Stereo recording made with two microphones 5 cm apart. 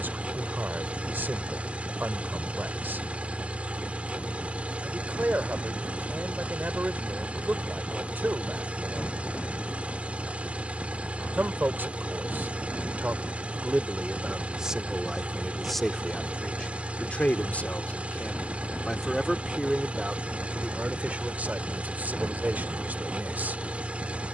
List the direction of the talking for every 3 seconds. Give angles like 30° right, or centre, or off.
40° right, 40° right, 40° right, 40° right, 20° right, 10° left, centre, 30° right.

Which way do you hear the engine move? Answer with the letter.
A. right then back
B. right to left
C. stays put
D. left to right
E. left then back
C.